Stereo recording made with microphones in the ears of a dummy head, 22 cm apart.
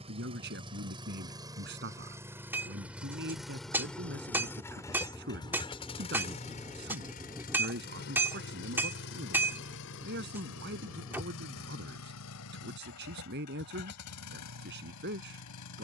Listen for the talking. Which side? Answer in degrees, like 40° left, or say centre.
50° right.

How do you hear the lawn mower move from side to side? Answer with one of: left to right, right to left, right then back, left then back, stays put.
right to left.